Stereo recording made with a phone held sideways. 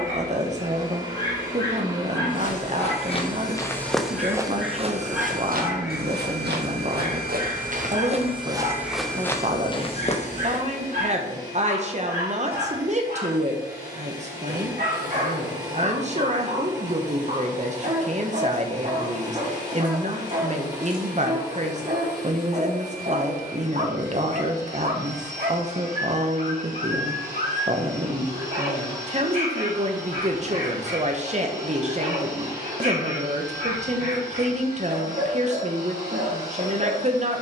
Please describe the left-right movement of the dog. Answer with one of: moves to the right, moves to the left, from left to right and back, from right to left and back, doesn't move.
moves to the right.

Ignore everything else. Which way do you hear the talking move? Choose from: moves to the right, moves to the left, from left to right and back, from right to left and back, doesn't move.
doesn't move.